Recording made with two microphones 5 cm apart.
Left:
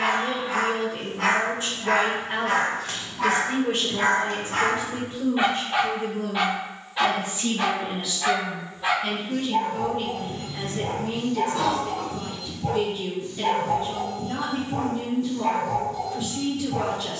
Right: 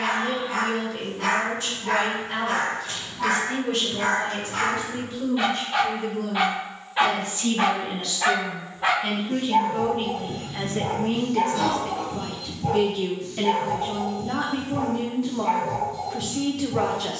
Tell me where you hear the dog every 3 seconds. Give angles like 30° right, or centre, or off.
70° left, 40° left, 30° right, 50° right, 30° left, 60° left.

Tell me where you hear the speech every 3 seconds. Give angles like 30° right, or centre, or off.
30° left, 30° left, 10° left, 30° right, 70° right, 70° right.